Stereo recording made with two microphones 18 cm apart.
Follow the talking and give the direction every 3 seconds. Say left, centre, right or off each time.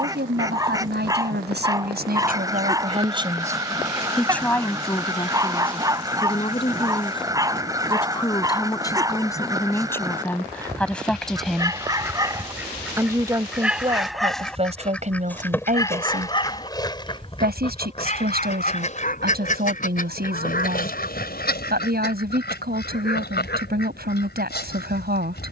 right, centre, left, centre, right, right, right, right, right.